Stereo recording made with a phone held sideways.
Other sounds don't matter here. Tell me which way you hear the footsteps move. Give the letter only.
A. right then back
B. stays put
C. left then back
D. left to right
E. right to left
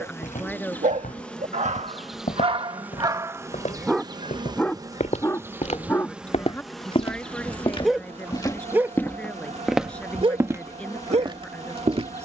D.